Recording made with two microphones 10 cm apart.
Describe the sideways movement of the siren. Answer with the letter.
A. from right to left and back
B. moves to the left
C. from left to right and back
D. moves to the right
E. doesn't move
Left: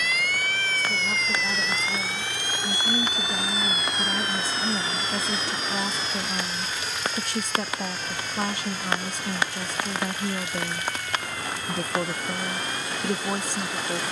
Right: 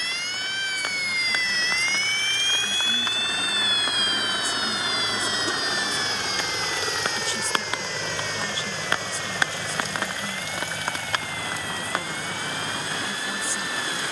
B.